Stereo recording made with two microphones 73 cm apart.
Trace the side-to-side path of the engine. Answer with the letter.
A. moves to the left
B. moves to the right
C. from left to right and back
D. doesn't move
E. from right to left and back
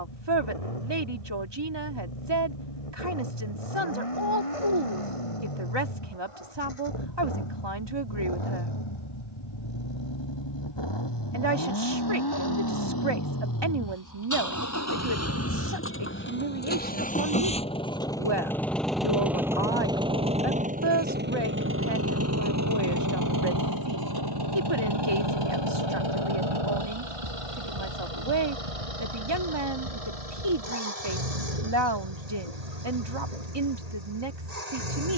B.